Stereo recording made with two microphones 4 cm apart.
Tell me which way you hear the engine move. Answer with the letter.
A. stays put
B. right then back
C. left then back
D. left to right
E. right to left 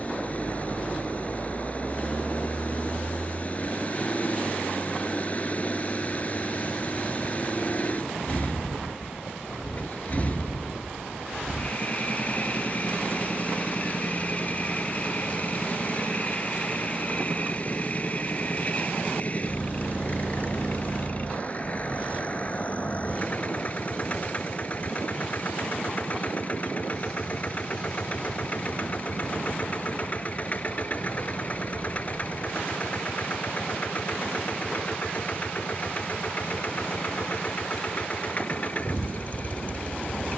A.